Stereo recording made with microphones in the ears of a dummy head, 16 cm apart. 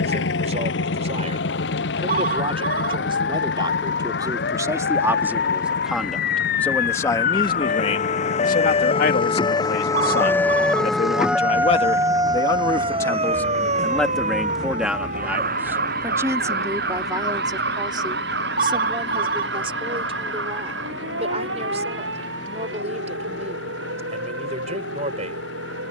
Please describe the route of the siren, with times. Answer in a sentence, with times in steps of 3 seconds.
In this clip you hear the siren on the left from 0 s, in the centre from 9 s and on the right from 12 s.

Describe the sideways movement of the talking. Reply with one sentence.
You can hear the talking go left and come back.